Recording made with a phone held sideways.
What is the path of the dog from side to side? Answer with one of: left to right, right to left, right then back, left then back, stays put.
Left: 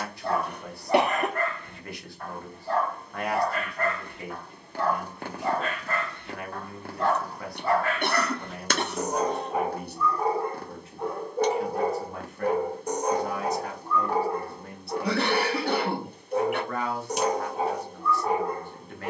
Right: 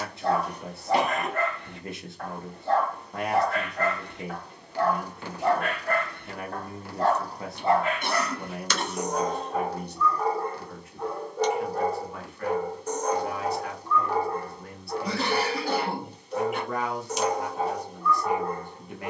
right to left.